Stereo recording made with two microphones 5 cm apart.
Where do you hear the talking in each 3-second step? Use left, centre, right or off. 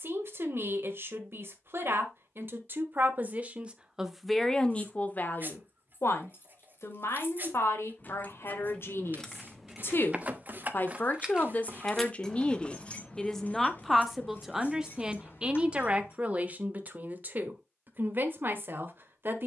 right, centre, left, left, centre, right, right.